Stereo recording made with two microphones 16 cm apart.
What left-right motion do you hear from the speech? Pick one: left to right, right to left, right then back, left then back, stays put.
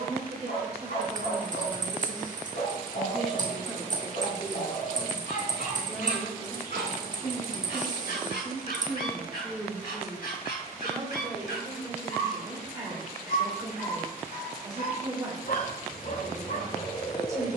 left then back.